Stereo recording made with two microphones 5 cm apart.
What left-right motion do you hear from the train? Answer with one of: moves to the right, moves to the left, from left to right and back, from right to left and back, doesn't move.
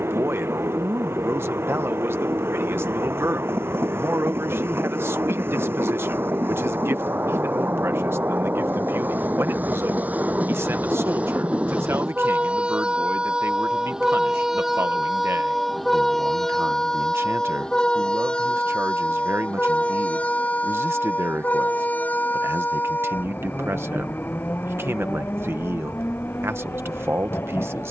moves to the left.